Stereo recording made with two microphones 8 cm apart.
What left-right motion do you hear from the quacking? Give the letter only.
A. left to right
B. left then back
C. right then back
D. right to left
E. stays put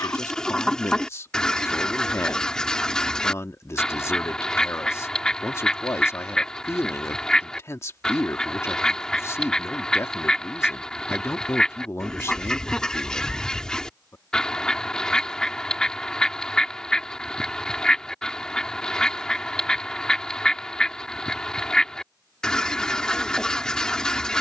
E.